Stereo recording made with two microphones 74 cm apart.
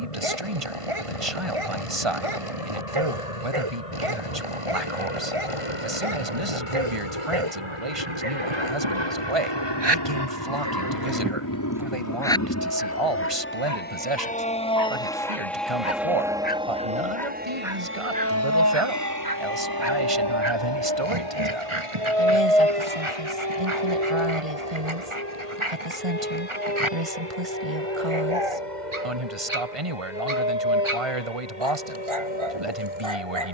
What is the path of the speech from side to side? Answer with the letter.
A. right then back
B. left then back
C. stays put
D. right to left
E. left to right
C.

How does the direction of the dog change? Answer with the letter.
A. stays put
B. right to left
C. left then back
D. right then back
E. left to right
C.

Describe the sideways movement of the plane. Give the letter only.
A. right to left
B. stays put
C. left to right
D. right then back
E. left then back
C.